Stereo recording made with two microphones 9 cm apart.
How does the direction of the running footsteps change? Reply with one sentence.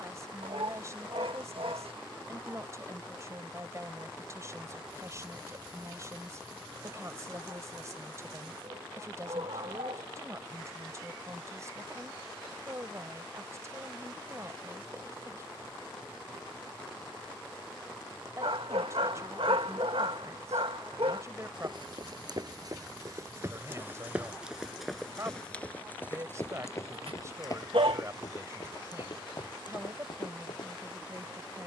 In this clip you hear the running footsteps go from the right side to the left.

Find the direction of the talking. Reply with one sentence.
In this clip you hear the talking on the right.